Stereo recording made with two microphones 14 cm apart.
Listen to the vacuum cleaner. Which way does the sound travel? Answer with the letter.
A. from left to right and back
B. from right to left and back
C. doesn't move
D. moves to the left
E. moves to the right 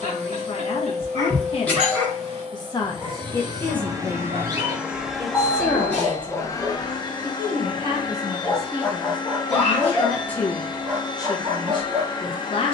D.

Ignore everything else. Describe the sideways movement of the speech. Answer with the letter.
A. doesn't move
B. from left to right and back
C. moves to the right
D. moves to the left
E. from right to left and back
B.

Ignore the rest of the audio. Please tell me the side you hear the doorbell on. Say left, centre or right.
centre.